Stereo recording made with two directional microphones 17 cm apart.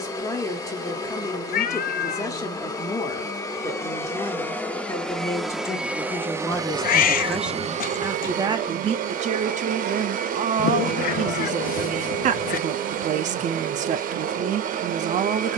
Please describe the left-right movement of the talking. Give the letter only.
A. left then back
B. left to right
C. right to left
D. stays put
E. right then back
B.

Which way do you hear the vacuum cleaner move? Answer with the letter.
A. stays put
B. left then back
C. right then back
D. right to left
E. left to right
E.